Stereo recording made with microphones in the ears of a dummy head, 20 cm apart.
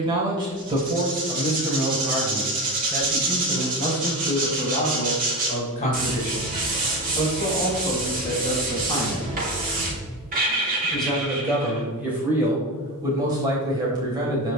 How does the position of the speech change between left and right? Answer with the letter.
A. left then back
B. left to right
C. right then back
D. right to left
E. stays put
A.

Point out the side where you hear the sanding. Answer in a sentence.
In this clip you hear the sanding on the right.